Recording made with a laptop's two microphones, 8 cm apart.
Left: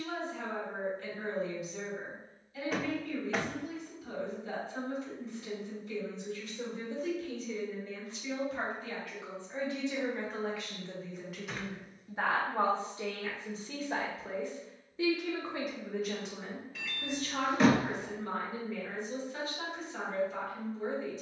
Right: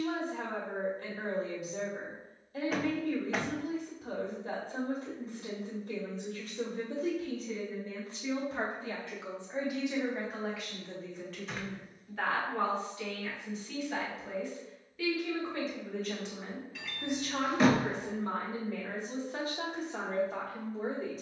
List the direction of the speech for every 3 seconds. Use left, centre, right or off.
right, right, right, centre, left, centre, right.